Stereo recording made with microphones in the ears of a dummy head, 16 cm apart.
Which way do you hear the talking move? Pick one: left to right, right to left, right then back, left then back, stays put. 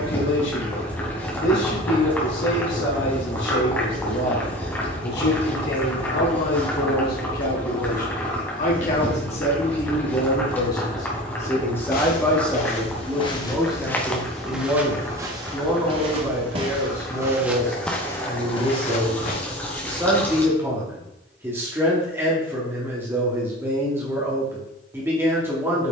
left to right.